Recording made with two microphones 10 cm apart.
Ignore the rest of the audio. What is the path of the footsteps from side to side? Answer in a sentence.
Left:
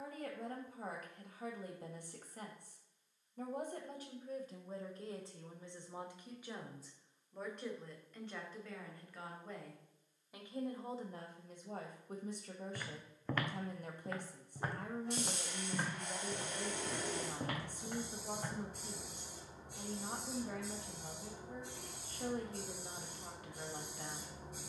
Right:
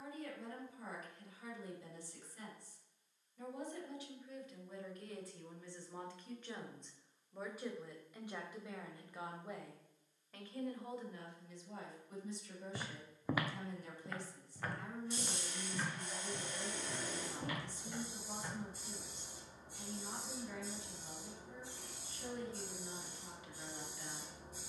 You can hear the footsteps go from the right side to the left.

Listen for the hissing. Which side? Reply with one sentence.
In this clip you hear the hissing on the left.